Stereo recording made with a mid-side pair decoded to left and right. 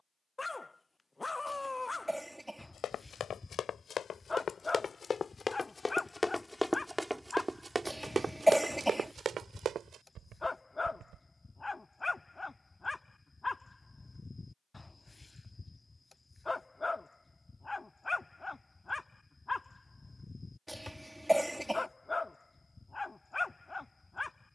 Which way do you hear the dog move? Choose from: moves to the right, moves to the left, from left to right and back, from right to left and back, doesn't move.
doesn't move.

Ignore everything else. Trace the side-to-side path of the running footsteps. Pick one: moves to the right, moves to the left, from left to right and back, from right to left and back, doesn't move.
moves to the right.